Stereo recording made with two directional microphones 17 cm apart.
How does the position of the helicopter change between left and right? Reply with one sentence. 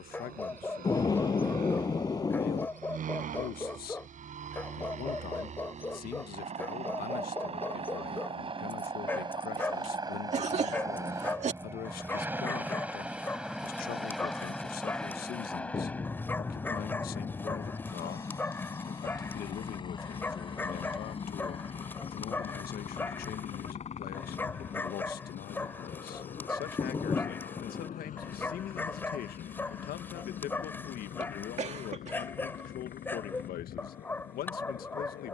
You can hear the helicopter move from right to left.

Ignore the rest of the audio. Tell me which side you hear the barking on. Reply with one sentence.
You can hear the barking in the centre.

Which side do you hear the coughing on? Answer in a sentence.
In this clip you hear the coughing on the right.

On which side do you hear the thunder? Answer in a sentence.
In this clip you hear the thunder on the left.